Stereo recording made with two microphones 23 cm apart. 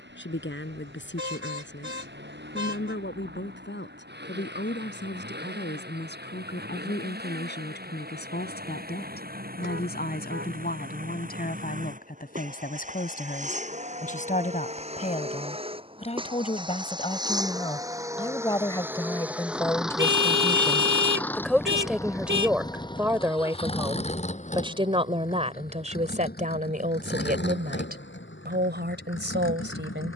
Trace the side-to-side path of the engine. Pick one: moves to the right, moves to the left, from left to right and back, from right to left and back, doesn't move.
moves to the left.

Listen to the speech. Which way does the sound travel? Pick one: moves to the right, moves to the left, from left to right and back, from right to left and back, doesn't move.
moves to the right.